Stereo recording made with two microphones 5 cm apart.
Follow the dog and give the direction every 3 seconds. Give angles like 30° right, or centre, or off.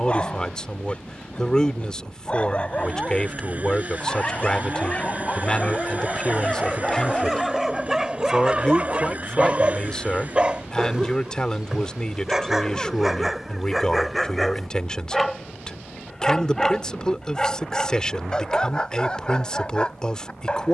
30° left, 30° left, centre, 20° right, centre, 10° left, 20° left.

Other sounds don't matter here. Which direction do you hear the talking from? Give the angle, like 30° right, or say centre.
20° left.